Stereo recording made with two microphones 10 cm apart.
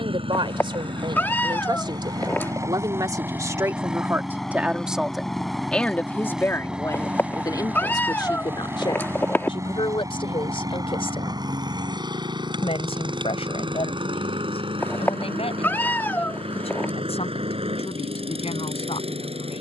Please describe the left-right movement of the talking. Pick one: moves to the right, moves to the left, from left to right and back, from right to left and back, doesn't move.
moves to the left.